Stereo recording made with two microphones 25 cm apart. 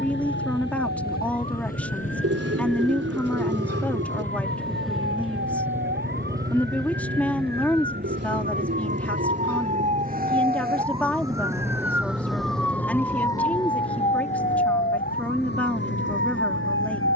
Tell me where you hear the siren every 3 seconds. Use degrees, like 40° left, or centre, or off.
60° right, 50° right, 40° right, 20° right, 20° left, 50° left.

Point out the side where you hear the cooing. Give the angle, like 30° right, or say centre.
70° right.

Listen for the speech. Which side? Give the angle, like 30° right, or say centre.
10° left.